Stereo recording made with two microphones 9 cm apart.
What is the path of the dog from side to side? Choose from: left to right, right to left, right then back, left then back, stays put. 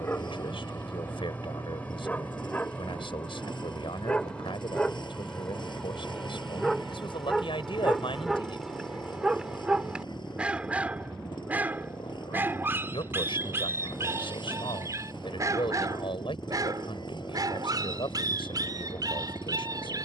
left to right.